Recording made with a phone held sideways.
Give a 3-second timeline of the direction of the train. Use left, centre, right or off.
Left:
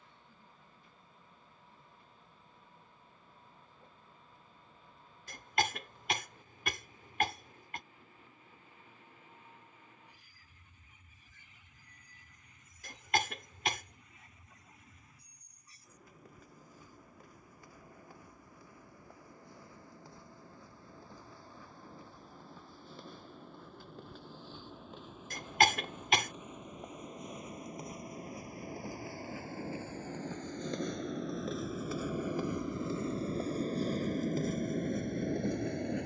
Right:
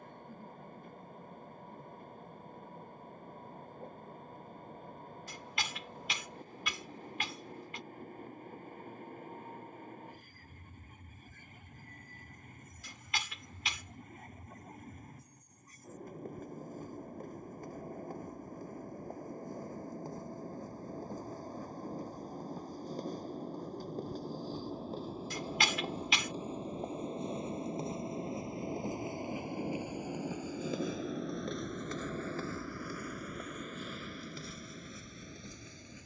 right, right, right, right, right, right, right, right, right, right, centre, left.